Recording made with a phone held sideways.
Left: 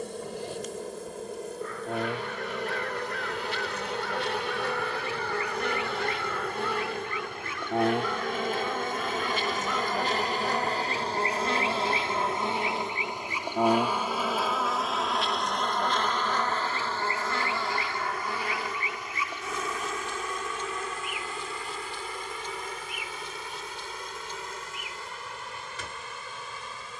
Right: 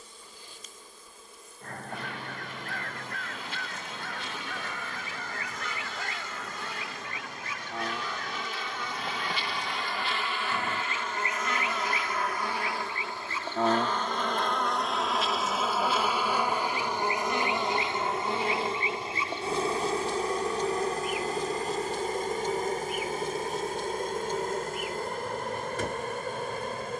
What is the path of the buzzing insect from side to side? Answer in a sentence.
You can hear the buzzing insect go from the left side to the right.